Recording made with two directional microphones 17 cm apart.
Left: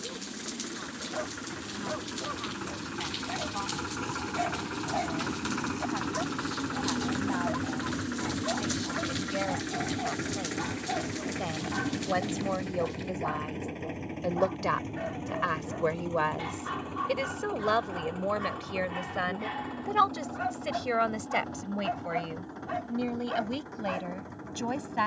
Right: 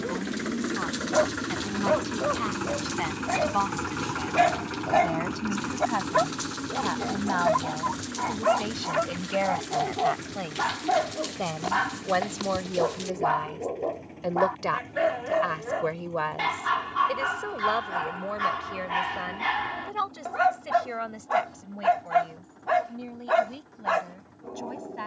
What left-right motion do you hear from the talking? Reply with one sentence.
You can hear the talking go from the right side to the left.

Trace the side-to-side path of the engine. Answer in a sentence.
You can hear the engine travel towards the left.